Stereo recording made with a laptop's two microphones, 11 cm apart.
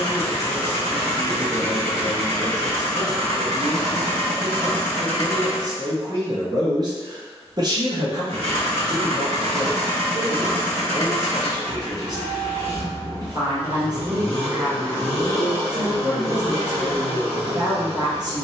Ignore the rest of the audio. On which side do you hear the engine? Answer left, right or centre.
right.